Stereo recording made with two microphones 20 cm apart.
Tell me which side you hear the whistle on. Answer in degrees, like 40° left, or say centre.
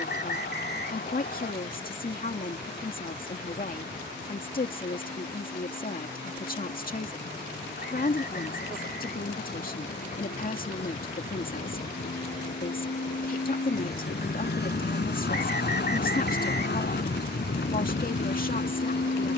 60° left.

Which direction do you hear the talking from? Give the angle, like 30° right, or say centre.
50° left.